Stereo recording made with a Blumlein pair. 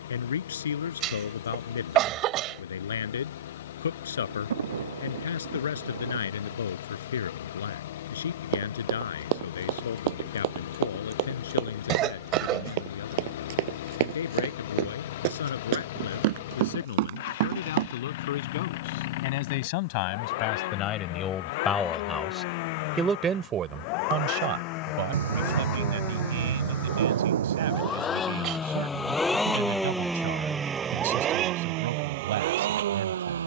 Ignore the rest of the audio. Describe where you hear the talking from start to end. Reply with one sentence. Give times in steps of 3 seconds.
In this clip you hear the talking on the left from 0 s, in the centre from 21 s and on the right from 24 s.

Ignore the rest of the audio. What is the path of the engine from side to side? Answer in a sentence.
In this clip you hear the engine move from left to right.